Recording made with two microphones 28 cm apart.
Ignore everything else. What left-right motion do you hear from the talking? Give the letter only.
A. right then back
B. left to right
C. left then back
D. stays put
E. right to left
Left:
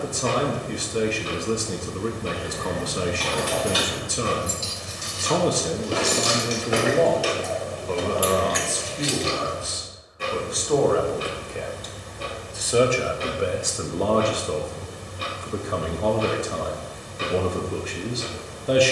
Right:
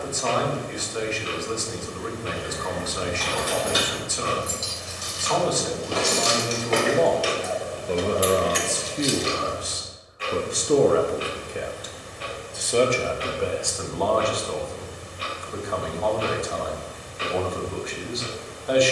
A.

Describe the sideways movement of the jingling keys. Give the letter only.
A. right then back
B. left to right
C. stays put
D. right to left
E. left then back
B.